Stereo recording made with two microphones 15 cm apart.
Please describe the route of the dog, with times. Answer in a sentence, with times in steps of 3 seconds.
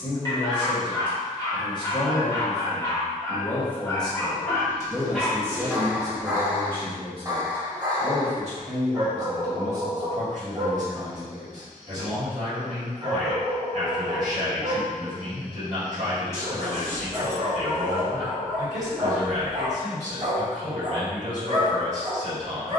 In this clip you hear the dog on the left from 0 s, in the centre from 3 s and on the right from 6 s.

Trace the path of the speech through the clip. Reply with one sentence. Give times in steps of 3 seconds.
You can hear the speech on the left from 0 s, in the centre from 3 s and on the right from 6 s.